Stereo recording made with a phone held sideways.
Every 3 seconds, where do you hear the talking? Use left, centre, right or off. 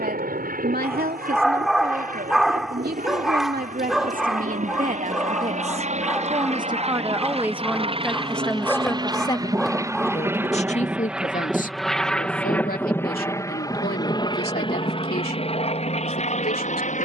right, right, centre, left, left, left.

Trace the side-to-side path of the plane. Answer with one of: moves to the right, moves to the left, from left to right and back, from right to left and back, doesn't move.
moves to the left.